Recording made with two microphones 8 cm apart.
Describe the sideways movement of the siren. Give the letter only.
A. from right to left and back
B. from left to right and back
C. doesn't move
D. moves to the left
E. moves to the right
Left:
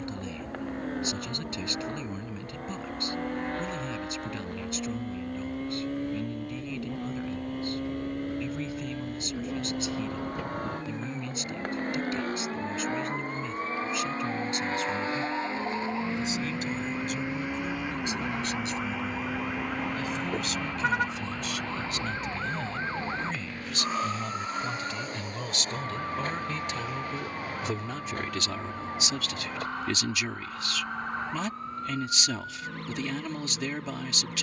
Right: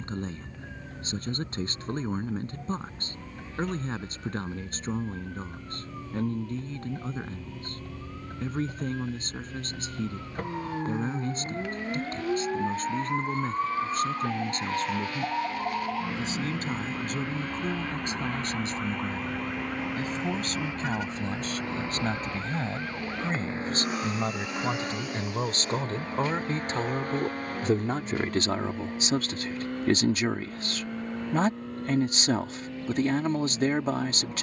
D.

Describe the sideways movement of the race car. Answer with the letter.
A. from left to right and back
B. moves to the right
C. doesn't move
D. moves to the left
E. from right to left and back
B.